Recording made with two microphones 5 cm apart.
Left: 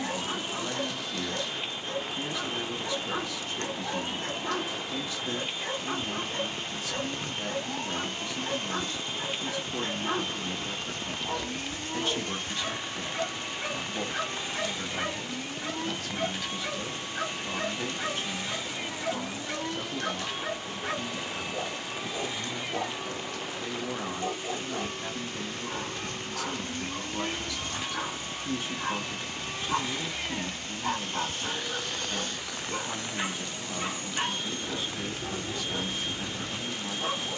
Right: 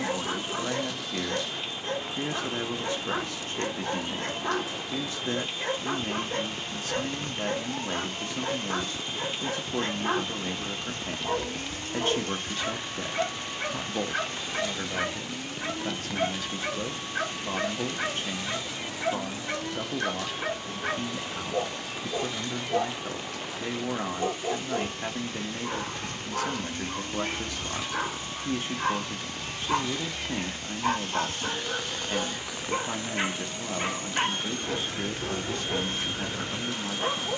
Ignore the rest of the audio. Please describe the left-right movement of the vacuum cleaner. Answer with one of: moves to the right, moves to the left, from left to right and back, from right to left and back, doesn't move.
moves to the right.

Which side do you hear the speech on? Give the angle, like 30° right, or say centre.
40° right.